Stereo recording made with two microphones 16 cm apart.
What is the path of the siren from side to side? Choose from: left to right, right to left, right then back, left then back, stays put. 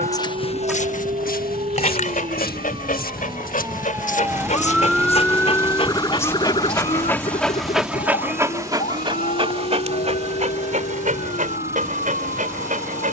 right to left.